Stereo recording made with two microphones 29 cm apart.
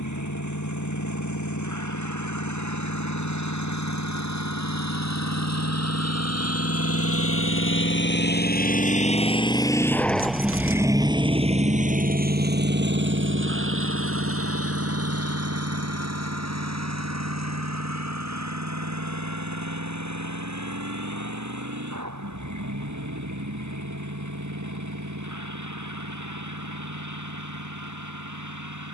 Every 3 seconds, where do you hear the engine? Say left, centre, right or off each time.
left, left, left, centre, right, right, right, right, right, right.